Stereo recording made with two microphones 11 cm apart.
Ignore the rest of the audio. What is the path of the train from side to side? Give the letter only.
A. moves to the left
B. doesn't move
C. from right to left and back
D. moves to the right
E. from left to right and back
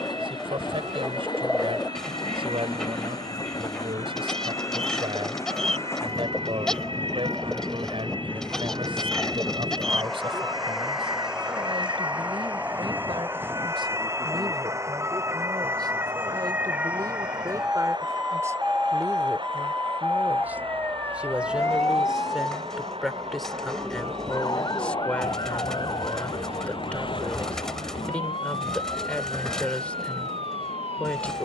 D.